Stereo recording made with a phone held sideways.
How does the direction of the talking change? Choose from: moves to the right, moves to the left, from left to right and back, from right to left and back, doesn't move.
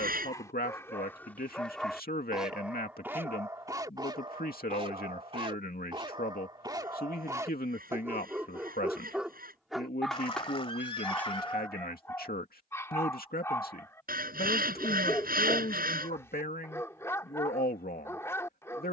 doesn't move.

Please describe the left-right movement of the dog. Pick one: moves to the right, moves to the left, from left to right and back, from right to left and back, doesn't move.
from left to right and back.